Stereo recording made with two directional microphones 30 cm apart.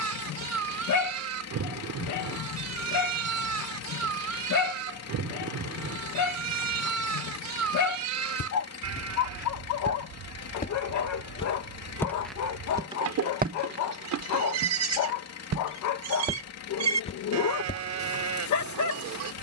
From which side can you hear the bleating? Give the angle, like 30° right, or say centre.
60° right.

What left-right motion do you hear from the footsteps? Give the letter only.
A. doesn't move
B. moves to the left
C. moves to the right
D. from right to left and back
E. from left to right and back
E.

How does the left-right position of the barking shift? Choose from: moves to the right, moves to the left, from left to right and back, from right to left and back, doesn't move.
doesn't move.